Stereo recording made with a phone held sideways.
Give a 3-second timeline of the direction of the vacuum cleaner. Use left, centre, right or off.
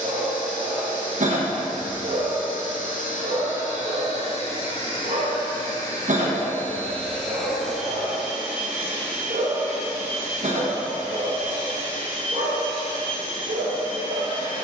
left, left, centre, right, right.